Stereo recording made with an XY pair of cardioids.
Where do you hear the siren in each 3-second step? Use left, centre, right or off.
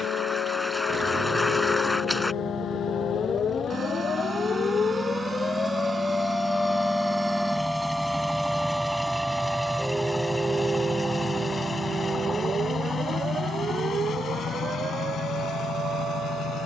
left, left, centre, right, right, right.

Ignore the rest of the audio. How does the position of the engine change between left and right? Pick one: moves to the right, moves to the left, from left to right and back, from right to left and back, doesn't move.
moves to the left.